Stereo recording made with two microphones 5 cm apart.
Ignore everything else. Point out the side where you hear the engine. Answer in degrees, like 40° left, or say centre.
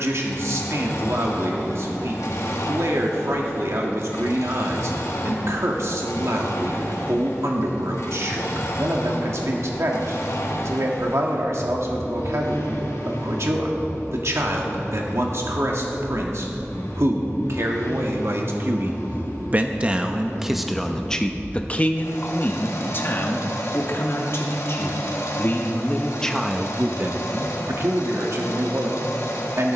80° left.